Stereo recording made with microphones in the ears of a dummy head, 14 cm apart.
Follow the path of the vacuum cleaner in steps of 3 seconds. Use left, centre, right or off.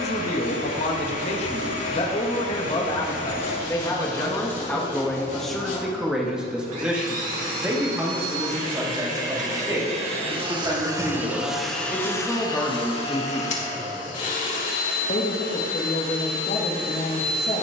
left, left, right, right, left, left.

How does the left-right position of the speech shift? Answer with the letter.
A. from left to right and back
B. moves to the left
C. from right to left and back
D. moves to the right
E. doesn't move
A.